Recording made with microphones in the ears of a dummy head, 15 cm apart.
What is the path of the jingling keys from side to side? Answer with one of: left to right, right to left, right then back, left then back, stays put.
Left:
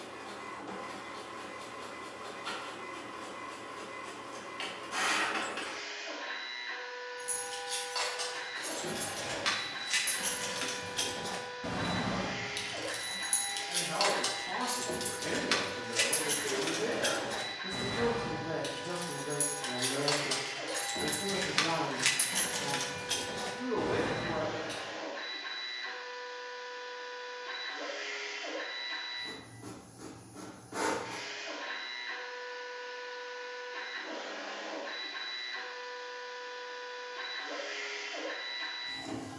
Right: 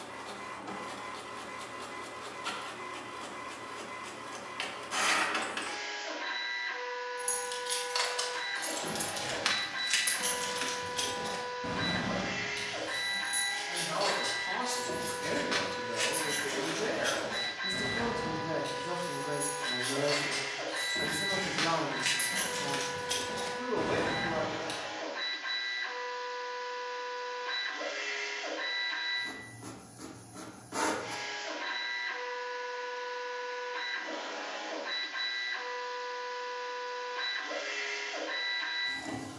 left then back.